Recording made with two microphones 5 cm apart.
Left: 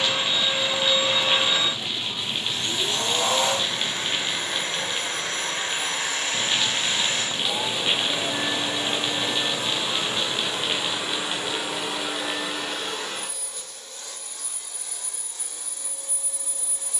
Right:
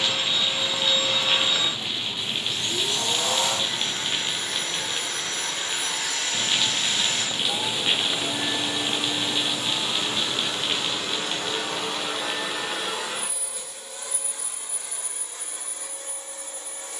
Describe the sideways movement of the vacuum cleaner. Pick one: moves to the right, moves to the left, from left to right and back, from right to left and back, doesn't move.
moves to the right.